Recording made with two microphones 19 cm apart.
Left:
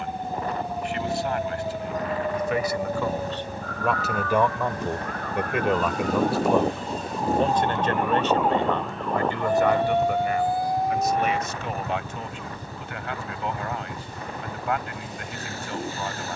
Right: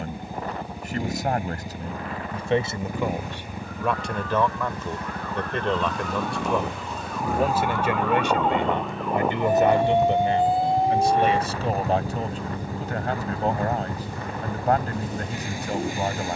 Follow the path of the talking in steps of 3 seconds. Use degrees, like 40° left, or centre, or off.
30° right, 10° left, 10° right, 30° right, 40° right, 40° right.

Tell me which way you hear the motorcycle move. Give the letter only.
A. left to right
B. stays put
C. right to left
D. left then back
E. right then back
B.